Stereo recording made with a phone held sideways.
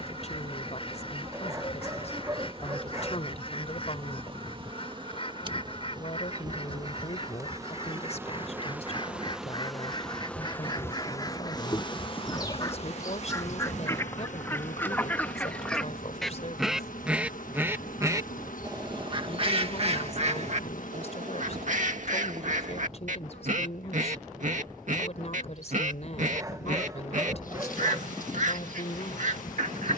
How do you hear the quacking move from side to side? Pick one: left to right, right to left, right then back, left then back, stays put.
left to right.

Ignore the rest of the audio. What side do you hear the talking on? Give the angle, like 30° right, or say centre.
50° left.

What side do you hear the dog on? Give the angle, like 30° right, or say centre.
20° right.